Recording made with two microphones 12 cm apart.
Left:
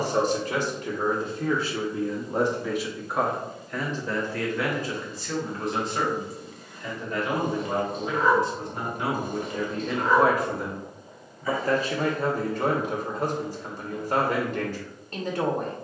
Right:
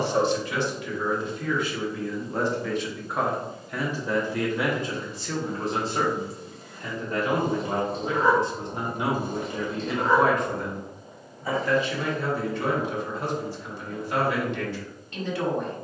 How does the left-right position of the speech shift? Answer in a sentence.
In this clip you hear the speech move from left to right and back again.